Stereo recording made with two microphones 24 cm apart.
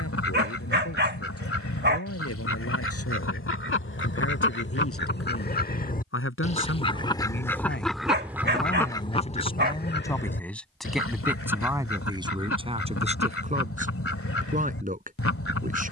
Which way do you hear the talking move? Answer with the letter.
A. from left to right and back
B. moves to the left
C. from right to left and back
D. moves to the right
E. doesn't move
D.